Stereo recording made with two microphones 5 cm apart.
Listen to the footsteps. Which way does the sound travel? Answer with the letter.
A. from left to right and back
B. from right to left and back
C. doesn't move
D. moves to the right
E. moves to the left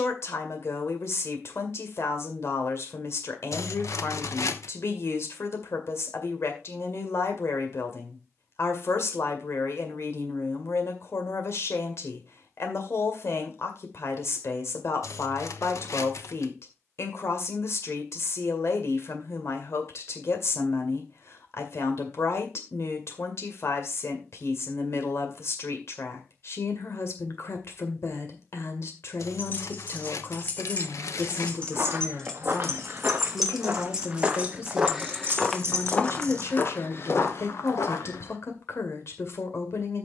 E.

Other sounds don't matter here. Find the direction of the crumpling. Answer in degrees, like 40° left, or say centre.
70° left.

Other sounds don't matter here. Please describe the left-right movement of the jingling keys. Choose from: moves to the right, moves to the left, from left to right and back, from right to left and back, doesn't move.
moves to the right.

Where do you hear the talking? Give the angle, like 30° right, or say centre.
60° left.